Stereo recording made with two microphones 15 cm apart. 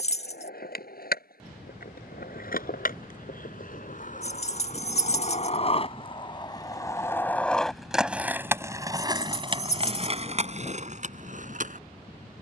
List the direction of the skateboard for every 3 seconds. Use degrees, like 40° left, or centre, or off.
70° left, 50° left, 10° left, 40° right.